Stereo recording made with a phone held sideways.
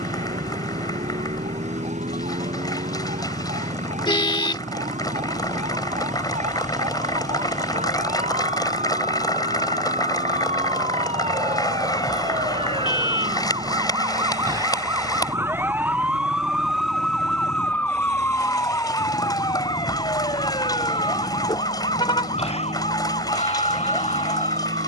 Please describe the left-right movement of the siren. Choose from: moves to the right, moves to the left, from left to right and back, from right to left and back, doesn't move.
moves to the left.